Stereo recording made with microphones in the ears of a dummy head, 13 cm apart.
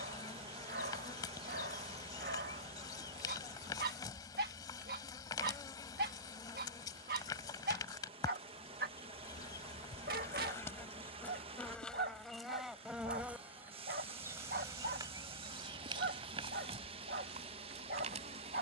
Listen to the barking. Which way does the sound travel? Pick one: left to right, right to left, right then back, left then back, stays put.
stays put.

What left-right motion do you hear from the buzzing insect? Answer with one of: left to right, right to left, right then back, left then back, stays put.
left to right.